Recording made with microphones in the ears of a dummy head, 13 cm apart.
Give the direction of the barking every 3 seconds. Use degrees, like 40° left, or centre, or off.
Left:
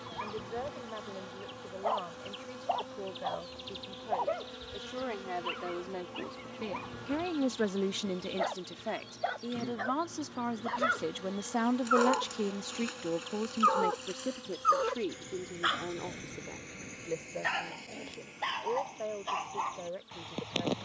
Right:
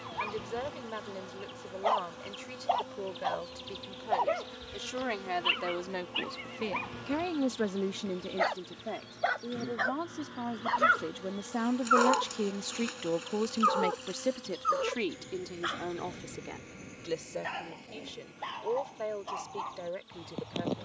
70° right, 70° right, 70° right, 40° right, centre, 40° left, 60° left.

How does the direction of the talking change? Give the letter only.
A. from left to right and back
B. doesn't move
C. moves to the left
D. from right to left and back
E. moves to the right
D.